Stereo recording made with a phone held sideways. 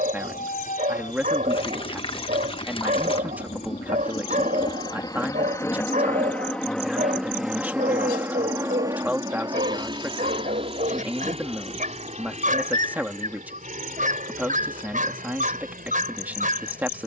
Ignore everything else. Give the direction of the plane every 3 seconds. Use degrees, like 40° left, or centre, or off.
60° left, 30° left, centre, 30° right, 50° right, 50° right.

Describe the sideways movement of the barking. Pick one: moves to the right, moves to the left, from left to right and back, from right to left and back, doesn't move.
doesn't move.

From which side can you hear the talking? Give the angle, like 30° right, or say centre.
10° right.